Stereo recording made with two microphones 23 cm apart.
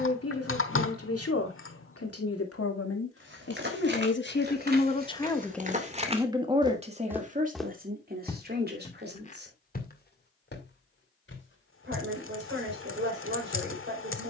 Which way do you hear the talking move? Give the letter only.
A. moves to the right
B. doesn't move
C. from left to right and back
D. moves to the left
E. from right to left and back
A.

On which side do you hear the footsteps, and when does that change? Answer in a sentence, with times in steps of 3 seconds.
In this clip you hear the footsteps not at all from 0 s, on the right from 3 s, in the centre from 6 s and on the left from 9 s.